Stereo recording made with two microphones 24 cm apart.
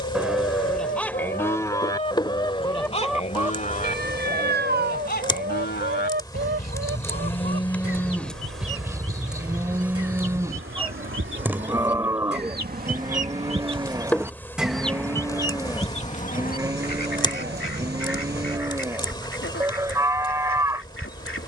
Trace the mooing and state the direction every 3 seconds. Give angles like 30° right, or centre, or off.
10° left, 40° left, 20° left, 10° right, 10° right, 10° right, 10° right.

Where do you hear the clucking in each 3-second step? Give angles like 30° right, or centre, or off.
30° left, 30° right, 60° right, 60° right, 20° right, 30° left, 60° left.